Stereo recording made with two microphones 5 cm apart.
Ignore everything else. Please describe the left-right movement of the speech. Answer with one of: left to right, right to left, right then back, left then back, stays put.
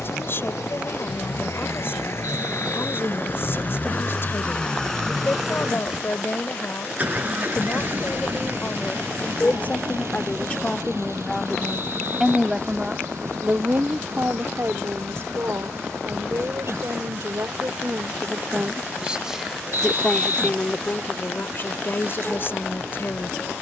right then back.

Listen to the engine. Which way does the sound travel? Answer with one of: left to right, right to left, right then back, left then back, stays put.
left to right.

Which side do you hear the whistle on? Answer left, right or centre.
right.